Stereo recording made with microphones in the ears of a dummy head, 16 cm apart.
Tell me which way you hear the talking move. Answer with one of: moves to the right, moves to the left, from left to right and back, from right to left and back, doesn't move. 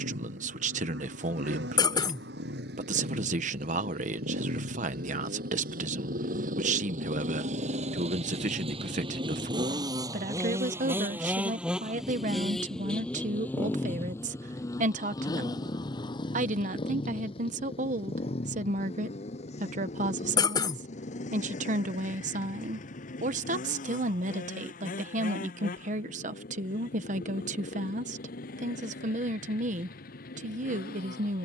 doesn't move.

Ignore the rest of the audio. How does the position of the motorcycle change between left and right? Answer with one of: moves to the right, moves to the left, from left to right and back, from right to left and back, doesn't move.
moves to the left.